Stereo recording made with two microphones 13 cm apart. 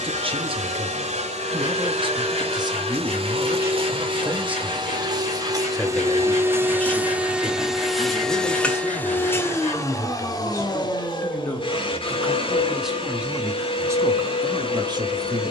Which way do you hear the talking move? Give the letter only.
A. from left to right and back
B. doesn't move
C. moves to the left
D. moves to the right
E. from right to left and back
E.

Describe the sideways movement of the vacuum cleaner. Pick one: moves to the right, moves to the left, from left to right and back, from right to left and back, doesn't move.
moves to the left.